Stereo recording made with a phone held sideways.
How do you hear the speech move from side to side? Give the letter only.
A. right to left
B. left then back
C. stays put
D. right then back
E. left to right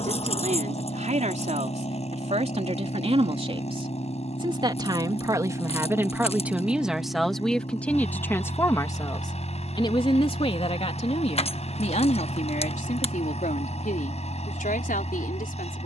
A.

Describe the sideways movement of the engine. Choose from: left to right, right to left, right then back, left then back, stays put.
stays put.